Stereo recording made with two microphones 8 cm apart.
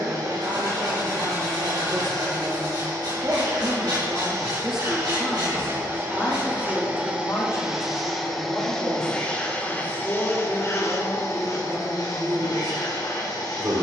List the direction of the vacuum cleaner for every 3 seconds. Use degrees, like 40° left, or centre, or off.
50° right, 40° right, 10° right, 30° left, 50° left.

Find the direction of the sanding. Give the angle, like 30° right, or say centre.
80° right.